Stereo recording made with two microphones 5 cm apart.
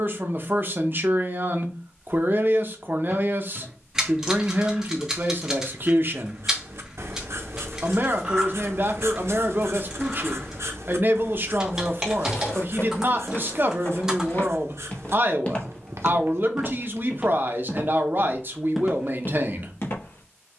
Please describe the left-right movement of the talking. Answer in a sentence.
In this clip you hear the talking stay in one place.